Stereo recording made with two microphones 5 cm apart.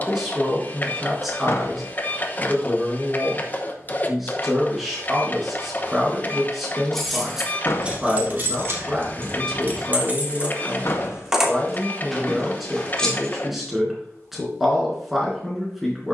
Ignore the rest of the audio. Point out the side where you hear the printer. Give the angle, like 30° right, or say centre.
30° left.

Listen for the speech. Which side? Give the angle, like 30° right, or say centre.
centre.